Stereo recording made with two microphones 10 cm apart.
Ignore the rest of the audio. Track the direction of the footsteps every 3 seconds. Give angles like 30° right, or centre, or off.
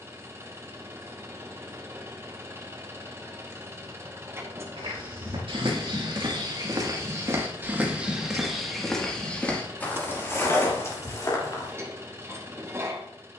off, 60° right, 20° right, 20° left, off.